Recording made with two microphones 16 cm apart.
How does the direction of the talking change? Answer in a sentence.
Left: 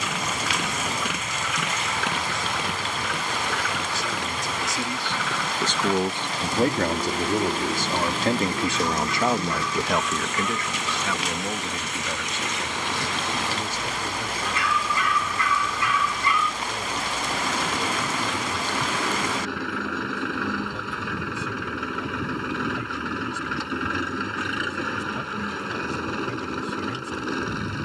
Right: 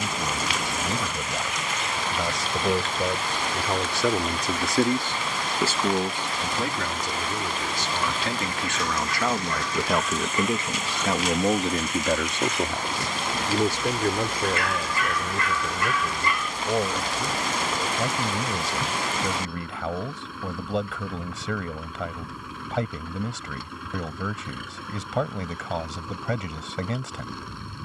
In this clip you hear the talking go left and come back.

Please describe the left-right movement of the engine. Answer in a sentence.
In this clip you hear the engine stay put.